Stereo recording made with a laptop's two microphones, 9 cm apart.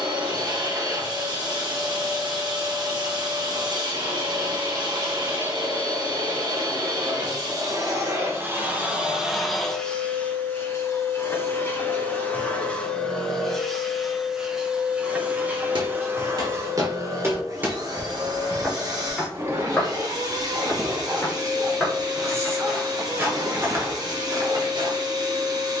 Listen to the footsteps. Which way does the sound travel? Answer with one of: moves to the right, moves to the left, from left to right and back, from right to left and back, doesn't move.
from right to left and back.